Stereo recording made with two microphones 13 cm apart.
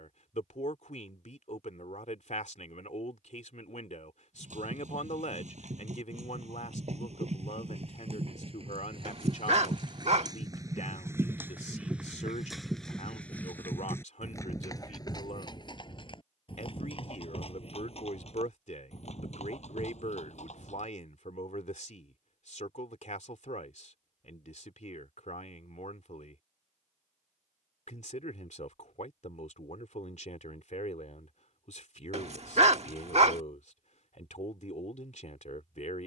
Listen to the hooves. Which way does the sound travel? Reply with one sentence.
In this clip you hear the hooves travel towards the left.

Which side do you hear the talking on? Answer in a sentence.
You can hear the talking on the left.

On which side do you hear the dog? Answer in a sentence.
In this clip you hear the dog on the right.